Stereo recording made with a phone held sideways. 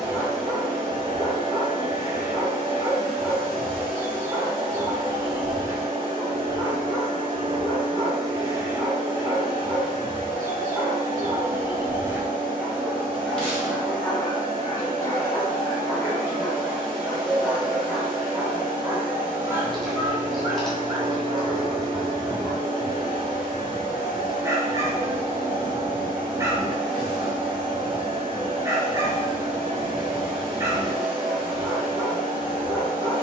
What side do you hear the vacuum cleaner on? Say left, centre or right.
right.